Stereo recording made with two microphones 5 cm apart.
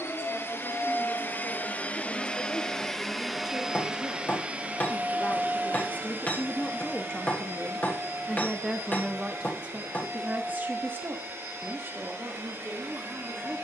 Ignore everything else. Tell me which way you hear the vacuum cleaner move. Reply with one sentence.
In this clip you hear the vacuum cleaner move to the right.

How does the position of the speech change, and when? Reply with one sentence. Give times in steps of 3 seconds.
In this clip you hear the speech on the left from 0 s, in the centre from 6 s and on the right from 9 s.